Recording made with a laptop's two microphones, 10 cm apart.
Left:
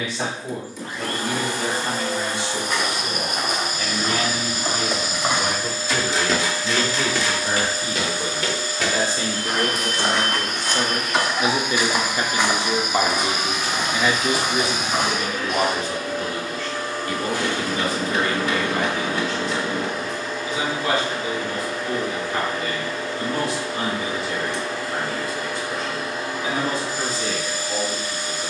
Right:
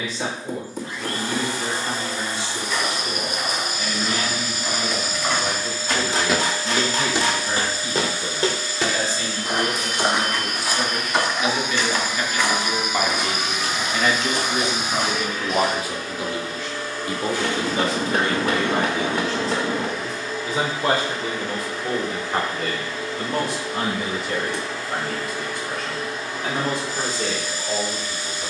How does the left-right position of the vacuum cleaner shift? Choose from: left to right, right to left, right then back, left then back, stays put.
stays put.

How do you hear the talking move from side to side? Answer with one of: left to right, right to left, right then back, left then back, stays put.
left to right.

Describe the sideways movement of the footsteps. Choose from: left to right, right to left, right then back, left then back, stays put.
right then back.